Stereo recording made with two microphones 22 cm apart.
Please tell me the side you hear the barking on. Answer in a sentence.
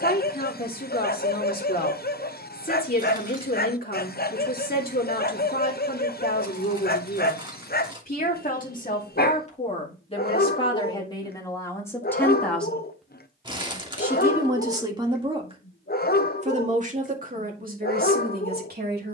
In this clip you hear the barking on the left.